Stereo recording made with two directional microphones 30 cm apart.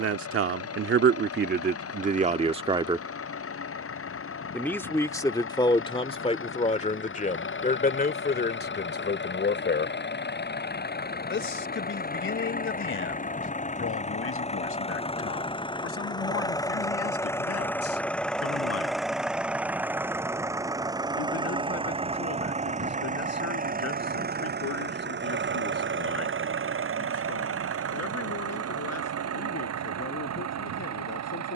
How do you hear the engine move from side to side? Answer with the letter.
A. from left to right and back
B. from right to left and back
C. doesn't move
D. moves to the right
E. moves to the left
D.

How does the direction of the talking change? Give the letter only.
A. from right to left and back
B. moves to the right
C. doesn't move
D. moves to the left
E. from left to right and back
D.